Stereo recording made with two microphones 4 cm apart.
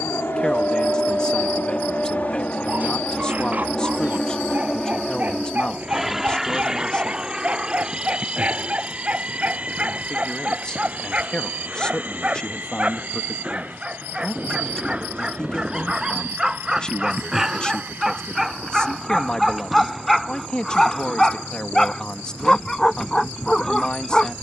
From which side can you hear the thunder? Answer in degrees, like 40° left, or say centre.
centre.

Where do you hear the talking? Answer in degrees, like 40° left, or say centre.
20° left.